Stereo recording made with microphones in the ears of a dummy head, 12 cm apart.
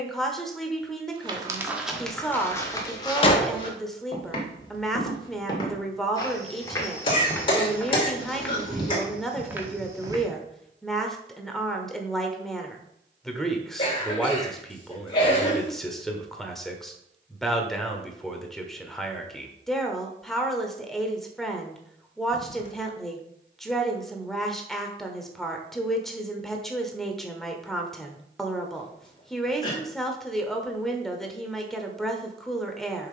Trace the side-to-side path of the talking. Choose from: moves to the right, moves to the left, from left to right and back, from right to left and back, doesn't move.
doesn't move.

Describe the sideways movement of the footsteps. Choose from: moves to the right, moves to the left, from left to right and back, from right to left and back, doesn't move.
from right to left and back.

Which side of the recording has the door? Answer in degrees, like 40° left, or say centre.
40° left.